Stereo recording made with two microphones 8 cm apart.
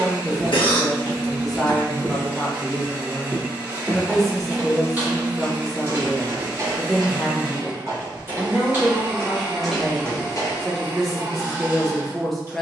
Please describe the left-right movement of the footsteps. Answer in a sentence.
In this clip you hear the footsteps go right and come back.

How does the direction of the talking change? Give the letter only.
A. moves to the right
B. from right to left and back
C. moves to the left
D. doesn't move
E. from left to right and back
D.